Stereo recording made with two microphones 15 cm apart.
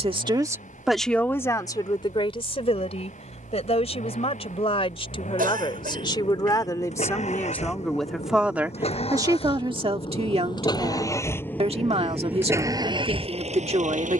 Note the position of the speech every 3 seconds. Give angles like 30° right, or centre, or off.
20° left, 40° left, 10° left, 40° right, 40° right.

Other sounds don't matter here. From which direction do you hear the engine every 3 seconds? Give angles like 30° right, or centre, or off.
60° left, 60° left, 50° left, 30° left, 40° right.